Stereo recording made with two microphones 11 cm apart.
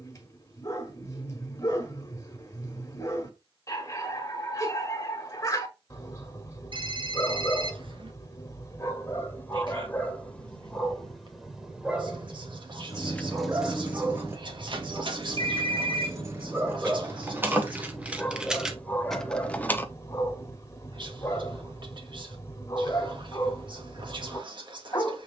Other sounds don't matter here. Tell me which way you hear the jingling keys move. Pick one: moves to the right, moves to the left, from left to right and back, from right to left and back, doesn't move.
from left to right and back.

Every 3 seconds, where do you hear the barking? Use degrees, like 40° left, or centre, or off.
30° left, 30° left, 30° left, 10° left, 20° right, 10° right, 20° left, 30° left, 30° left.